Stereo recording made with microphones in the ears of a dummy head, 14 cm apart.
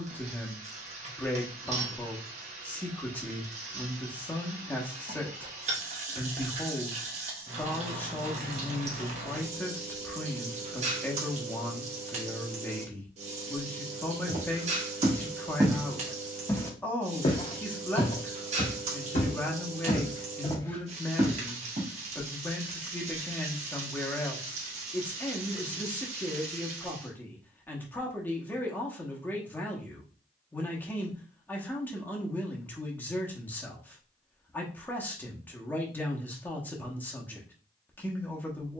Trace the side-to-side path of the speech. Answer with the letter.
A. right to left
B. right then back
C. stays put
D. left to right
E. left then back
C.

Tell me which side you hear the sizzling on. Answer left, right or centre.
right.